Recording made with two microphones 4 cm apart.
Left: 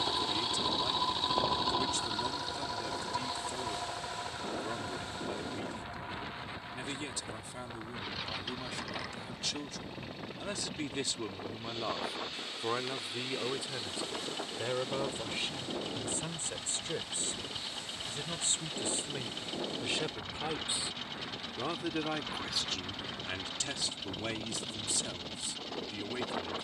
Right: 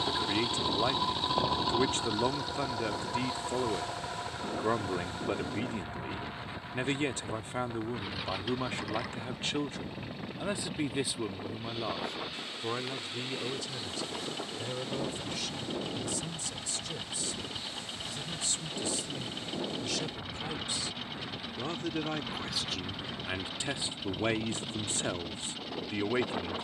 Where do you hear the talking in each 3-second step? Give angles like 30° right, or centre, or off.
40° right, 40° right, 40° right, 20° right, 20° left, 40° left, 30° left, centre, 40° right.